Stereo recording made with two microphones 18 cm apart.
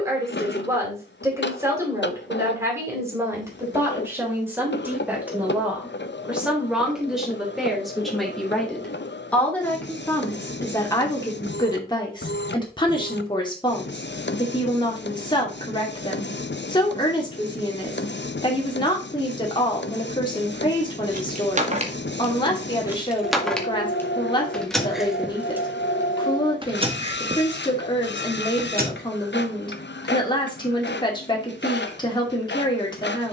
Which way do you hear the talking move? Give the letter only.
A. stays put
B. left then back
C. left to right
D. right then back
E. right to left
E.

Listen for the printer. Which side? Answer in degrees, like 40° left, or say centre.
80° left.